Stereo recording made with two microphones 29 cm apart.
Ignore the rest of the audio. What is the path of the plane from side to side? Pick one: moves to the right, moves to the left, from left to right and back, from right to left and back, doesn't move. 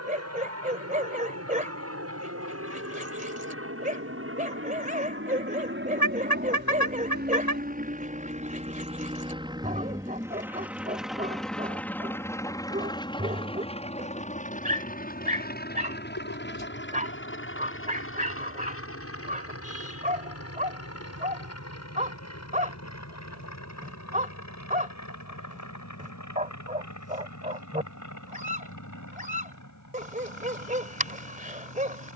moves to the left.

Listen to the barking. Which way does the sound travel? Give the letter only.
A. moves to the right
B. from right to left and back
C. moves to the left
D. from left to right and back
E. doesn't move
E.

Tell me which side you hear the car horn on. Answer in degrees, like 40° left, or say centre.
70° left.